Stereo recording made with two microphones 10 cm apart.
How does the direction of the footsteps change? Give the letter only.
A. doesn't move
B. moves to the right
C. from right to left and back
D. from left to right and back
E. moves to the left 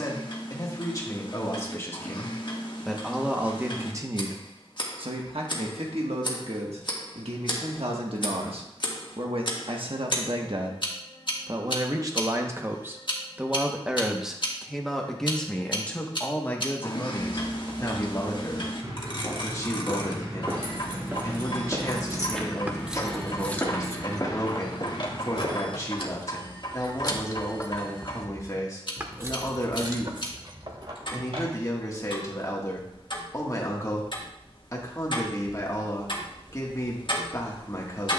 E.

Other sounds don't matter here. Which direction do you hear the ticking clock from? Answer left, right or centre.
left.